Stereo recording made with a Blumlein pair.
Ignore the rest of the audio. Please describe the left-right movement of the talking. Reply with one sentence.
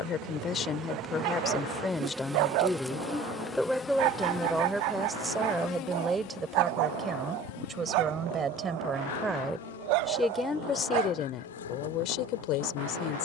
You can hear the talking go right and come back.